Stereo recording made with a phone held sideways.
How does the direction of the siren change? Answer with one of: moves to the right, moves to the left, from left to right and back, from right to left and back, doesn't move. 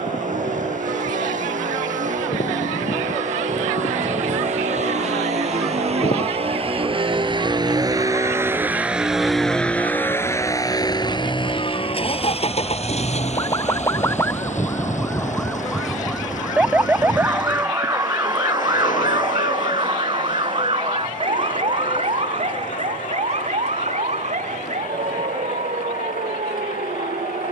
moves to the right.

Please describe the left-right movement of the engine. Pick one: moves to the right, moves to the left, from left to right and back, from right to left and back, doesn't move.
moves to the left.